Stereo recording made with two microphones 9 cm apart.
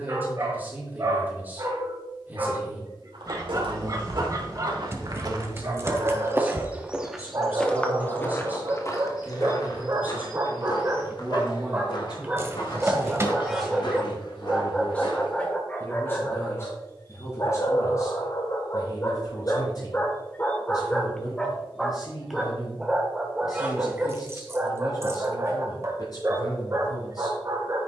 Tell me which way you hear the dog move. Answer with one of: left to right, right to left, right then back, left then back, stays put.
left then back.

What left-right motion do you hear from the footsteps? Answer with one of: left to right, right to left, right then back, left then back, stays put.
right to left.